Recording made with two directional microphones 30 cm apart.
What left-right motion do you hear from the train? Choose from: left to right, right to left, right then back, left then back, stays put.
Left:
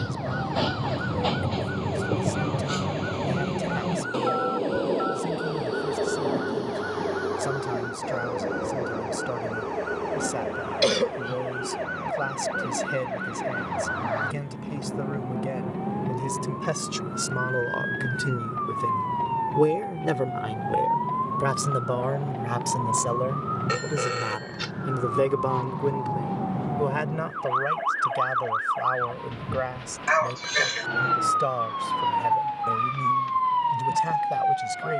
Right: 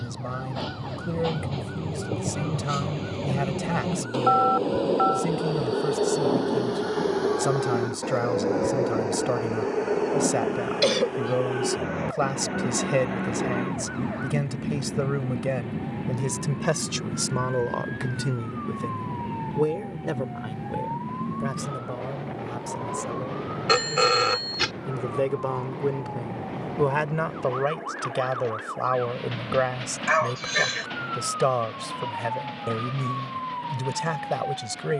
left to right.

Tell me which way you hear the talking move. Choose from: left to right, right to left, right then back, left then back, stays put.
left then back.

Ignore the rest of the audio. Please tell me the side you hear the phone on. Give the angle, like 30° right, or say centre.
50° right.